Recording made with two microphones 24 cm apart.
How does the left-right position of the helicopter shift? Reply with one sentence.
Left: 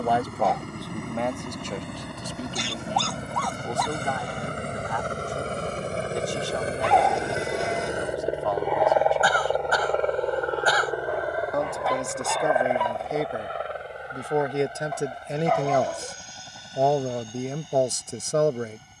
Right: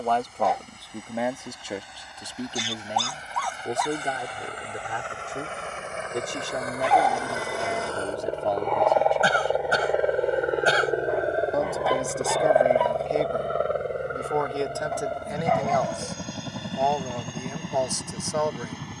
You can hear the helicopter move from left to right.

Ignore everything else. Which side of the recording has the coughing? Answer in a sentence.
You can hear the coughing on the right.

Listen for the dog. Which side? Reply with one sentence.
In this clip you hear the dog in the centre.